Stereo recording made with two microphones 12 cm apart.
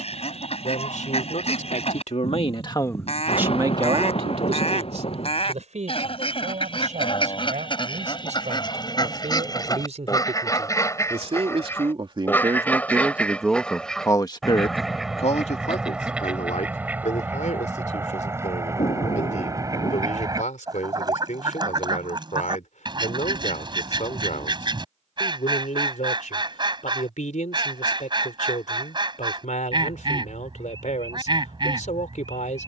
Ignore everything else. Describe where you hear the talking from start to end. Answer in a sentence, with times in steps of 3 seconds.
In this clip you hear the talking on the left from 0 s, on the right from 3 s, in the centre from 12 s and on the left from 15 s.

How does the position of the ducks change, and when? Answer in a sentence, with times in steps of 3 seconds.
You can hear the ducks on the left from 0 s, in the centre from 12 s and on the right from 18 s.